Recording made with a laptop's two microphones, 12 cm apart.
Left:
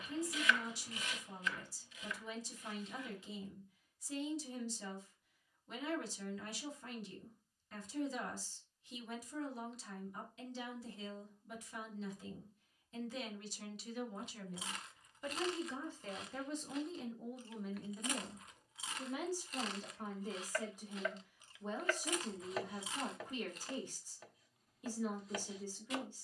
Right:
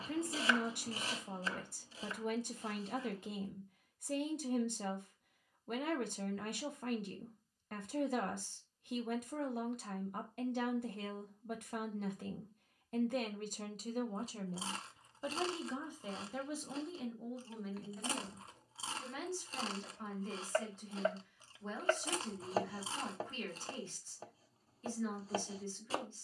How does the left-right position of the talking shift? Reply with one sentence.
In this clip you hear the talking move from right to left.